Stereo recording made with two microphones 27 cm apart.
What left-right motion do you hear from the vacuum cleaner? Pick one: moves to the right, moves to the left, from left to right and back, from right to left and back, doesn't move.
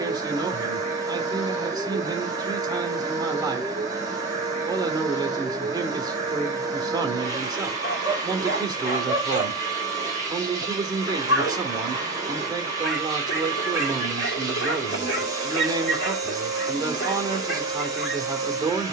doesn't move.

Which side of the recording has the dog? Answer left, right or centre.
left.